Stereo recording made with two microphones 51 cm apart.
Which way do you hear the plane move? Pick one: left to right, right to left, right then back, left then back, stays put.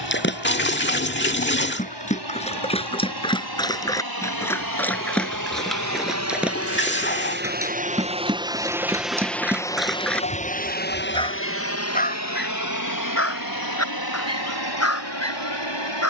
right to left.